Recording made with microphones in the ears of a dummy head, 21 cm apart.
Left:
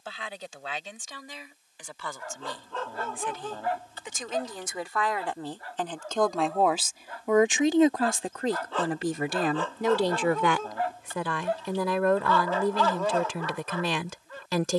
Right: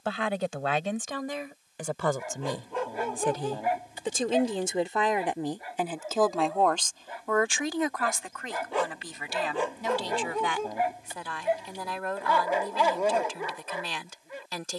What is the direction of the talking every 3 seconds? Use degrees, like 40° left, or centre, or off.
50° right, 20° right, 20° left, 50° left, 60° left.